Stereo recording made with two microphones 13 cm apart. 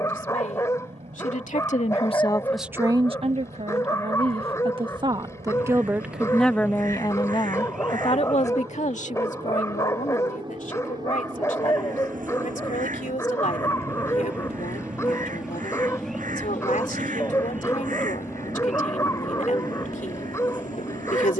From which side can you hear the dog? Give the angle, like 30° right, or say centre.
20° left.